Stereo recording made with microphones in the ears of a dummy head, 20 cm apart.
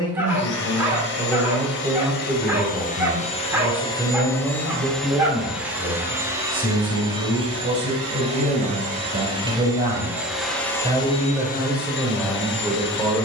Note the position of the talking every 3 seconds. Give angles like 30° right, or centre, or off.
10° left, 10° right, 30° right, 20° right, centre.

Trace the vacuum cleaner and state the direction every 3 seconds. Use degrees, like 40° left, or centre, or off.
50° left, 10° left, 20° right, 10° left, 50° left.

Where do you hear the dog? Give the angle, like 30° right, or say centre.
10° right.